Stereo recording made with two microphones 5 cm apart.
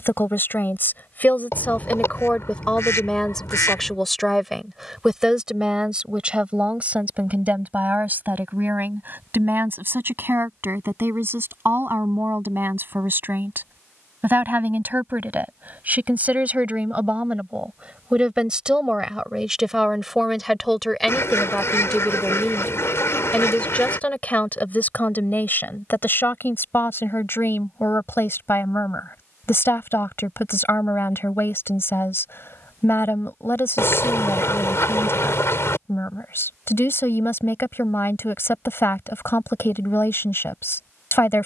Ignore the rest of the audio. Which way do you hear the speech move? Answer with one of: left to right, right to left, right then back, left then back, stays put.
right then back.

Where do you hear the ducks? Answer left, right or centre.
left.